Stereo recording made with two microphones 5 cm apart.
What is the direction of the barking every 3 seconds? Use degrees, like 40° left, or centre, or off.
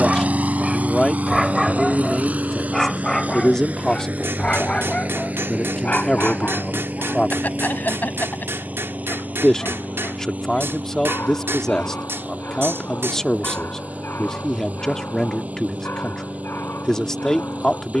10° right, 20° left, 30° left, 50° left, 50° left, 50° left.